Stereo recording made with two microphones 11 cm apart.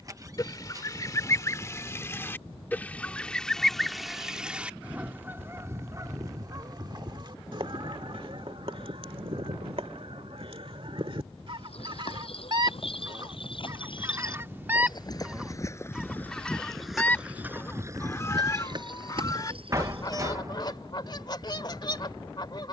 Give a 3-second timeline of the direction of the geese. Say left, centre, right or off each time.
left, centre, right, right, right, centre, left, left.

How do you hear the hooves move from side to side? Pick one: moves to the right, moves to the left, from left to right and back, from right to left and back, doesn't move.
moves to the right.